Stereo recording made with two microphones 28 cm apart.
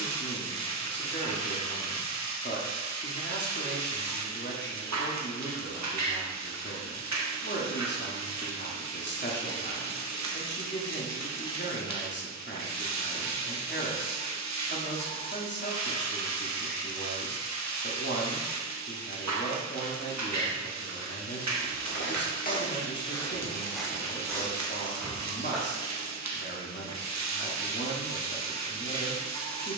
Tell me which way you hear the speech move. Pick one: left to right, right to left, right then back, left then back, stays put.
stays put.